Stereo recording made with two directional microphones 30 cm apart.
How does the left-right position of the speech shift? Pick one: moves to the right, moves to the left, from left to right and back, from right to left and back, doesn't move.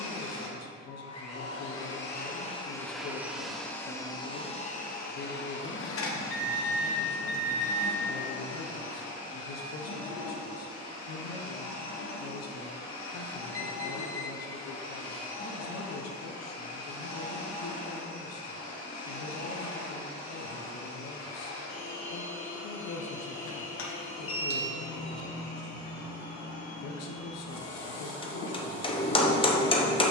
doesn't move.